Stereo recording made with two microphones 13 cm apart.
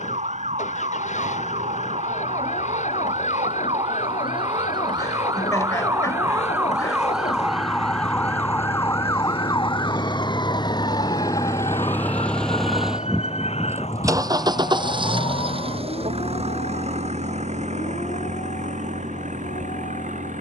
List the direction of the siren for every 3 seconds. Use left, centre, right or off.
right, right, centre, left, left, left, left.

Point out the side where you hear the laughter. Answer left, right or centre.
left.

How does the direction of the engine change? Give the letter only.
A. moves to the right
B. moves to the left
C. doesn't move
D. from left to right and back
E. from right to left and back
A.